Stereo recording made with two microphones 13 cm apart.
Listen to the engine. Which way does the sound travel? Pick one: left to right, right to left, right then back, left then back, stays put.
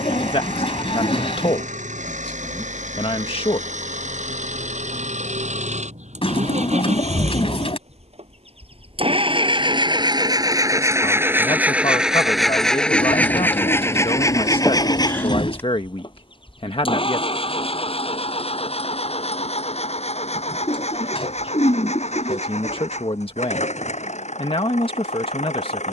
right to left.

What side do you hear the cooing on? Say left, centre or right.
left.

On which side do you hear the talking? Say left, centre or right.
left.